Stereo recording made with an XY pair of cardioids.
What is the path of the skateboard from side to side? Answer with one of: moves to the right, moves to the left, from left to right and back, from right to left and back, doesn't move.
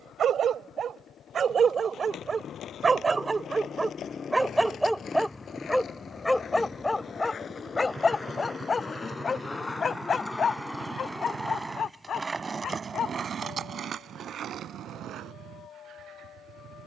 moves to the right.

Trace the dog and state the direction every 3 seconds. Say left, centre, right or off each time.
right, centre, left, left, left, left.